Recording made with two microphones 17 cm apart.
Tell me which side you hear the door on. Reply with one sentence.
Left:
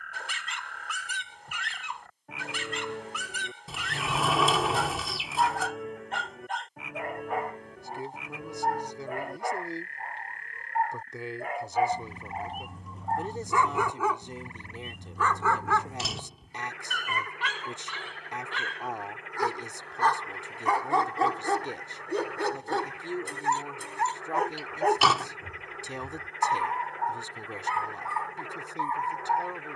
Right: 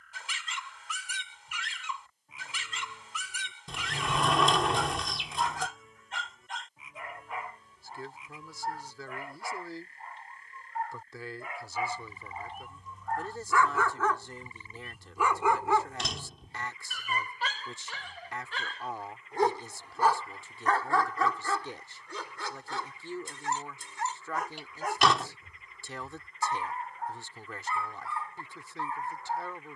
You can hear the door in the centre.